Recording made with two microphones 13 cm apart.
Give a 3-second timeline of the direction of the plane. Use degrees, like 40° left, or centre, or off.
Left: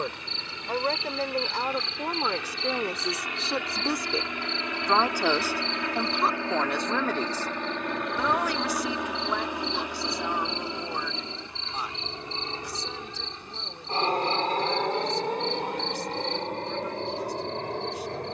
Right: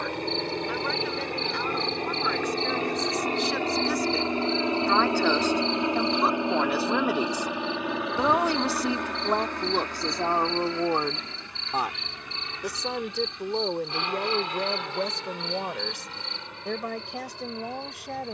50° right, 30° right, 10° right, 20° left, 30° left, 50° left.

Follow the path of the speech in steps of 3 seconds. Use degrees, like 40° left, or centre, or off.
40° left, 20° left, 10° right, 50° right, 70° right, 80° right.